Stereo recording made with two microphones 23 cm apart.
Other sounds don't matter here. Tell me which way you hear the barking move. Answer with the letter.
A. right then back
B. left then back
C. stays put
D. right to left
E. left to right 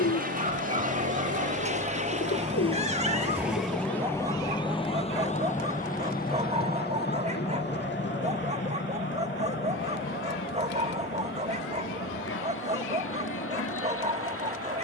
C.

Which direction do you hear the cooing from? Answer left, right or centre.
left.